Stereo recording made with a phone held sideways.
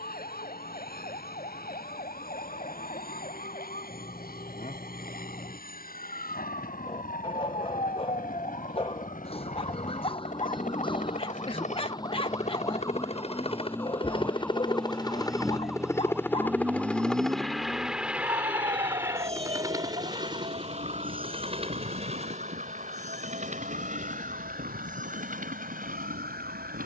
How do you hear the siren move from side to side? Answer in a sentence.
You can hear the siren go from the left side to the right.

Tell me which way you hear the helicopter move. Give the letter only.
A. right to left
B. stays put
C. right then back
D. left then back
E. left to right
E.